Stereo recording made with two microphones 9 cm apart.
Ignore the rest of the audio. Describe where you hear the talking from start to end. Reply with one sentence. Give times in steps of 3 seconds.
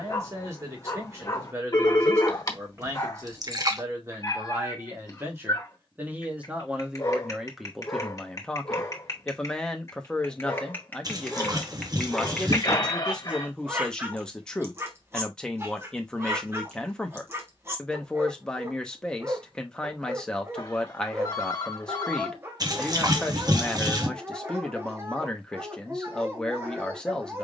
You can hear the talking on the right from 0 s and in the centre from 6 s.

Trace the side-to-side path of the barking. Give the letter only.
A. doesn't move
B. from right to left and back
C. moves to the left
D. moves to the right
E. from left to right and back
D.